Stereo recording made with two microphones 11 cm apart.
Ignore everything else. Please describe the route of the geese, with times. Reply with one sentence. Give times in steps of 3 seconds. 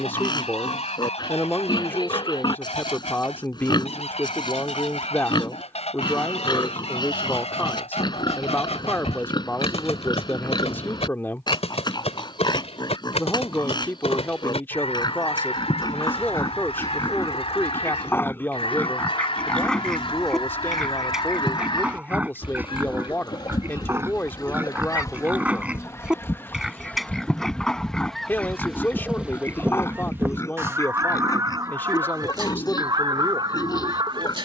In this clip you hear the geese on the left from 0 s, in the centre from 27 s and on the right from 30 s.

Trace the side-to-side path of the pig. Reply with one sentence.
In this clip you hear the pig move from left to right and back again.